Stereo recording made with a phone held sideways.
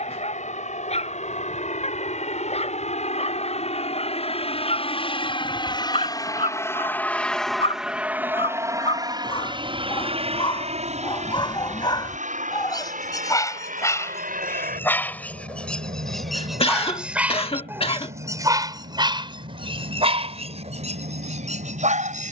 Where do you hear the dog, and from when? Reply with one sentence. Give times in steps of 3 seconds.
You can hear the dog on the left from 0 s, in the centre from 15 s and on the right from 18 s.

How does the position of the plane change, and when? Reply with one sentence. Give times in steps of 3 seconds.
You can hear the plane on the left from 0 s, in the centre from 6 s and on the right from 9 s.